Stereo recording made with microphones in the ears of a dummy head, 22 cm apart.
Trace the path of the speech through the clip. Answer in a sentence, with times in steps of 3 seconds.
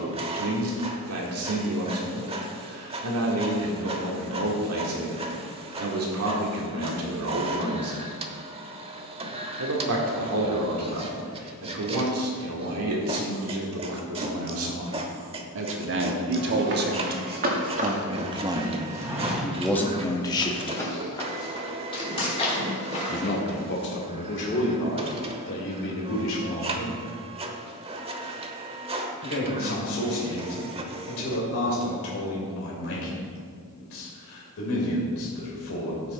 In this clip you hear the speech on the right from 0 s, in the centre from 18 s and on the left from 21 s.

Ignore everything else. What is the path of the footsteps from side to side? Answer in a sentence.
You can hear the footsteps go from the right side to the left.